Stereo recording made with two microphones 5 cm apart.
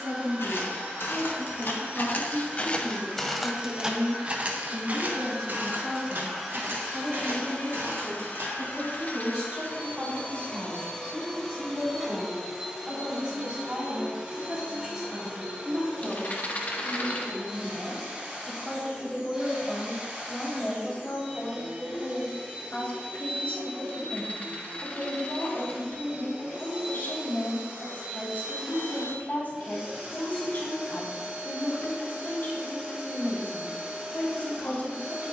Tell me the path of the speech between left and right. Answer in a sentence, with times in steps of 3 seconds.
In this clip you hear the speech on the right from 0 s, in the centre from 15 s and on the left from 21 s.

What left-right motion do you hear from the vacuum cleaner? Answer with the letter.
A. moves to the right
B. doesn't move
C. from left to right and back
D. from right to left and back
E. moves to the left
D.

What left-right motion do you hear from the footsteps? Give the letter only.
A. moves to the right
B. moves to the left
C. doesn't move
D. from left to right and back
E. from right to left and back
A.